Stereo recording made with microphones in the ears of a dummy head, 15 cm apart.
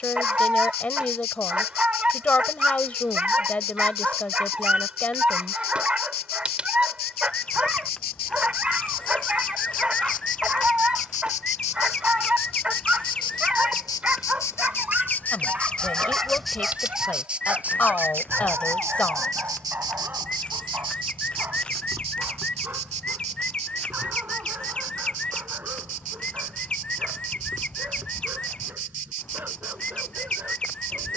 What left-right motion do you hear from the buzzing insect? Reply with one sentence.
In this clip you hear the buzzing insect move to the right.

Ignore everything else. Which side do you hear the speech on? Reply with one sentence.
You can hear the speech in the centre.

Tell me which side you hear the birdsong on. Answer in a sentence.
In this clip you hear the birdsong in the centre.